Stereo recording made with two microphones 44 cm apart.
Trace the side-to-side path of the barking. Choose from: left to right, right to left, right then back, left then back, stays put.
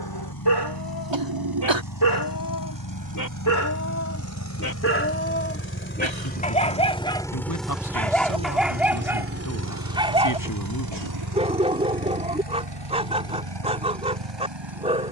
left to right.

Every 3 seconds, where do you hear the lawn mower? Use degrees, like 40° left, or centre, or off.
50° left, 40° left, centre, 50° right, 70° right.